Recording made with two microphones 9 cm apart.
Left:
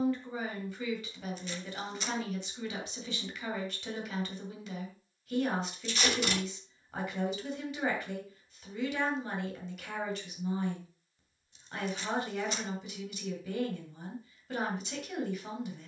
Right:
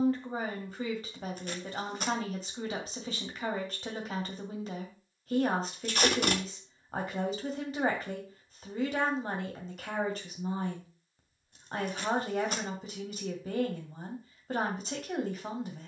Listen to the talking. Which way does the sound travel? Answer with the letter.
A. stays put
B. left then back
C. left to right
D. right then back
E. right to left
A.